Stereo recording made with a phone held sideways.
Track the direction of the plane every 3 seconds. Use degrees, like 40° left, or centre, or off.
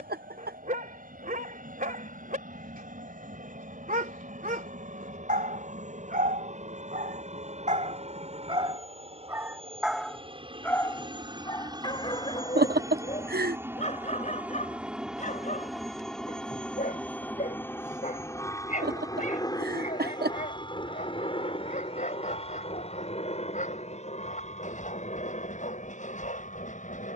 60° right, 60° right, 50° right, 30° right, 20° right, 10° left, 20° left, 40° left, 50° left.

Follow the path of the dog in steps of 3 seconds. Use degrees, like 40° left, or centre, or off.
60° right, 60° right, 50° right, 10° left, 40° left, 50° left, 50° left, 50° left, 50° left.